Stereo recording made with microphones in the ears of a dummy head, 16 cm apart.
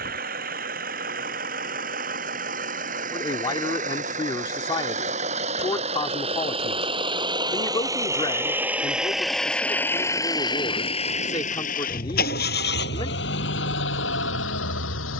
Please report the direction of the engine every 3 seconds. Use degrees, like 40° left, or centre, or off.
50° right, 40° right, 20° right, 20° left, 70° left.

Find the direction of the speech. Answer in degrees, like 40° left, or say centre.
30° left.